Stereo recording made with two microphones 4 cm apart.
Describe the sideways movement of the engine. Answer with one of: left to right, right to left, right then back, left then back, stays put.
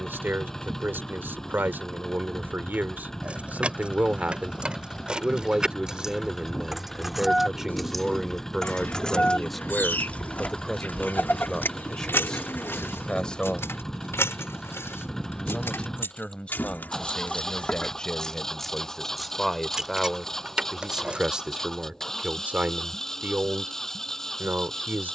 stays put.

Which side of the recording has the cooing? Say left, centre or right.
left.